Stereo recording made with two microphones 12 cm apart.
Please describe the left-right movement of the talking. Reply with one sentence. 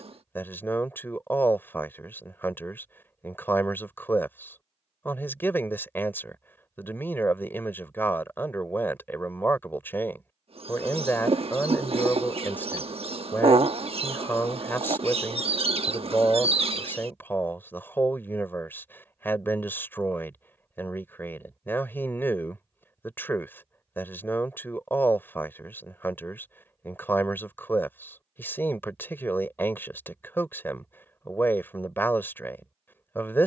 You can hear the talking stay put.